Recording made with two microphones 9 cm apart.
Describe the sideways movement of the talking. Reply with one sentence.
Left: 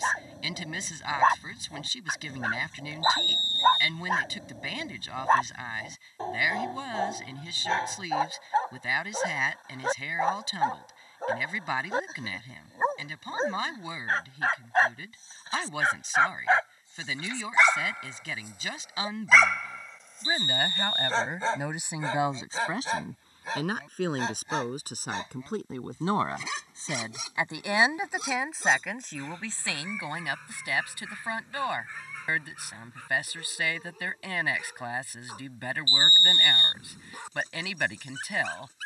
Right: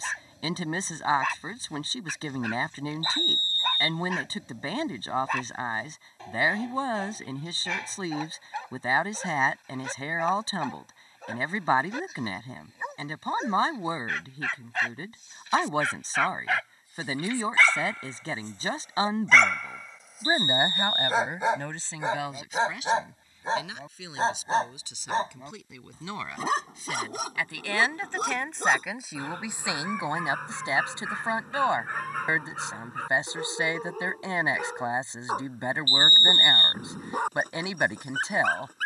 In this clip you hear the talking move from right to left and back again.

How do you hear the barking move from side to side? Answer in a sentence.
You can hear the barking go from the left side to the right.